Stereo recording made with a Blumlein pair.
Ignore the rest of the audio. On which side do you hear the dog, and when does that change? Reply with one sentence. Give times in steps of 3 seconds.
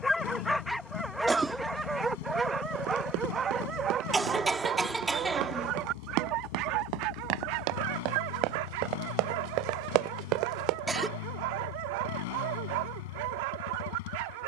In this clip you hear the dog in the centre from 0 s and on the right from 3 s.